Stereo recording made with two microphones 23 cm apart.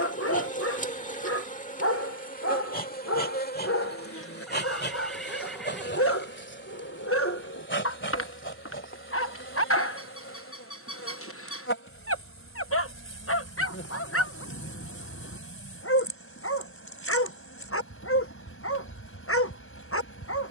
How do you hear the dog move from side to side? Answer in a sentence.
In this clip you hear the dog stay put.